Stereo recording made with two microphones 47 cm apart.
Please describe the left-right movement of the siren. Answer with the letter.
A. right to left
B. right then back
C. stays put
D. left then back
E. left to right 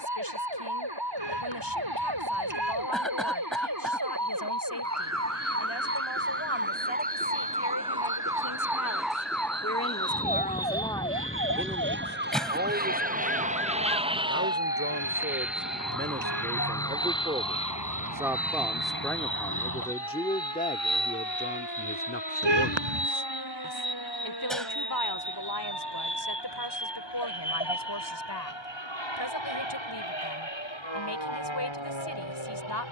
A.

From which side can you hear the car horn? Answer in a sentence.
You can hear the car horn on the right.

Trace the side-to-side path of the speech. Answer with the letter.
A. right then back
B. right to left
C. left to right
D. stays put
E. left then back
A.